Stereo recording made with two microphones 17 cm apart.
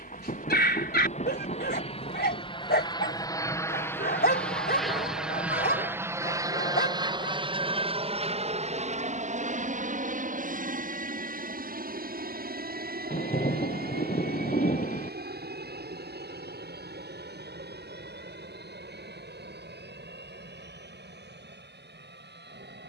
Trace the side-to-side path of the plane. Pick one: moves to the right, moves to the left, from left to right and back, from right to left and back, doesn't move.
moves to the right.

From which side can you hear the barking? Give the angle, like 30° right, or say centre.
70° left.